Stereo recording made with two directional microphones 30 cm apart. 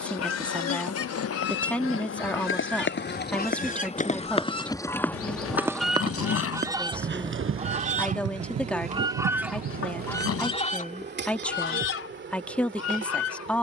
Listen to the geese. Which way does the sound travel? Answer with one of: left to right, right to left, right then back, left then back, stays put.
right then back.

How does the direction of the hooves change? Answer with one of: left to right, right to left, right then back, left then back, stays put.
left to right.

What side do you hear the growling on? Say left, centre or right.
left.